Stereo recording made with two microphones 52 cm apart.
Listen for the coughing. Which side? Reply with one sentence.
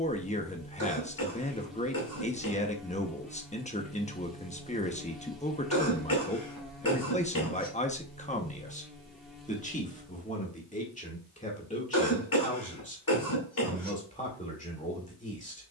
You can hear the coughing on the left.